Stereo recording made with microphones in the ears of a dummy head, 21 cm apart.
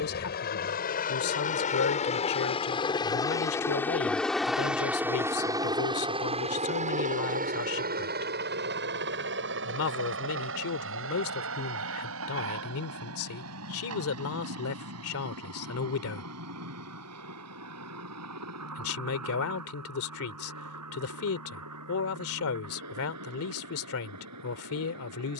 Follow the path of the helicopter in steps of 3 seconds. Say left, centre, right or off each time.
left, centre, right, right, right, right, right, right, right.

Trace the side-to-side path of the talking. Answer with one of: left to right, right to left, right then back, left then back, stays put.
stays put.